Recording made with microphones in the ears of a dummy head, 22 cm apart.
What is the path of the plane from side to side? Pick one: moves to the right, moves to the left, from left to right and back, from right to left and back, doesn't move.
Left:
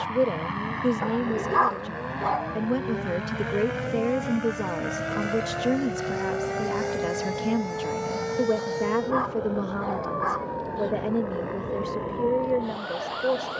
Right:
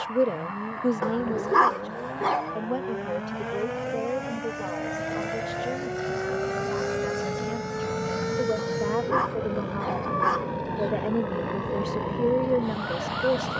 moves to the right.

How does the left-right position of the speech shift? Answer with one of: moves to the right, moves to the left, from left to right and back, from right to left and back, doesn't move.
from right to left and back.